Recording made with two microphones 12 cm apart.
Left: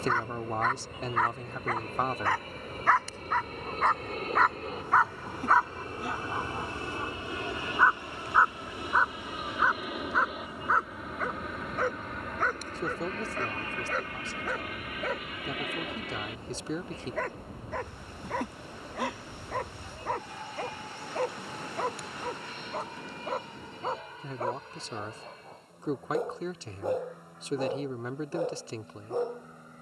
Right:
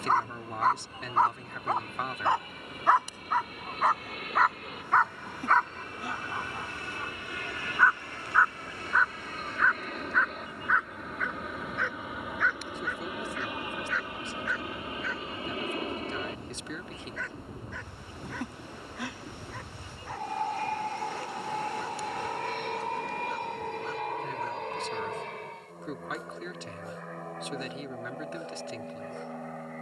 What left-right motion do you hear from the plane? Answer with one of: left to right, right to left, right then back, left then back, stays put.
left to right.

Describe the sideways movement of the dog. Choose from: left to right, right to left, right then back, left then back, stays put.
right to left.